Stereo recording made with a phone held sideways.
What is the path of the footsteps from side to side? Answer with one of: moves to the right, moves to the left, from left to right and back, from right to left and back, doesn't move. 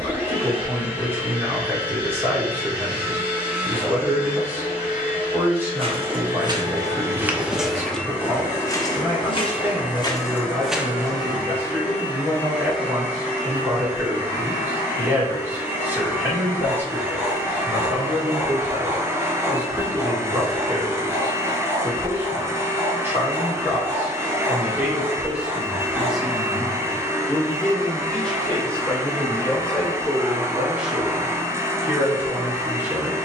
from right to left and back.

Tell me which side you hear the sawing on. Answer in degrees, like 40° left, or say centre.
20° right.